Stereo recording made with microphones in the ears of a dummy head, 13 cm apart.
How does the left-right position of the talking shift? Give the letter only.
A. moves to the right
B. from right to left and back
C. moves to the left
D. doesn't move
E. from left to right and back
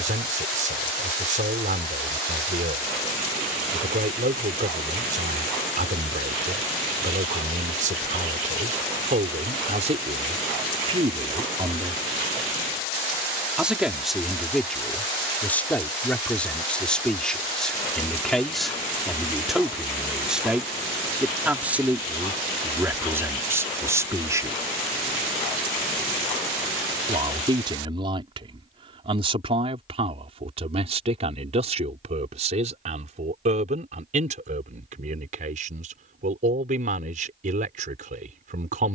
B.